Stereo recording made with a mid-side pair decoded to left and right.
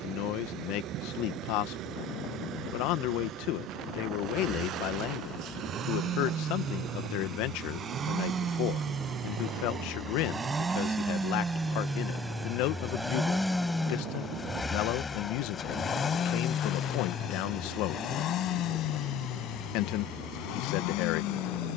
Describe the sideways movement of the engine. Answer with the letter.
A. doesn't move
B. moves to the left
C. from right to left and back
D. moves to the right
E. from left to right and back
B.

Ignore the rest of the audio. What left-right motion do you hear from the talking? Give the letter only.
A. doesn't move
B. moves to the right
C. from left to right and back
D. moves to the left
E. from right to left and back
A.